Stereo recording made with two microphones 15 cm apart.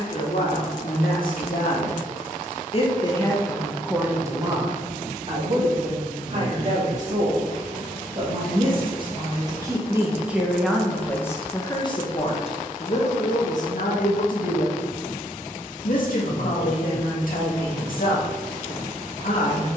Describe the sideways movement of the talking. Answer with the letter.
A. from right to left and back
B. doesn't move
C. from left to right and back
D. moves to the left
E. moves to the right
C.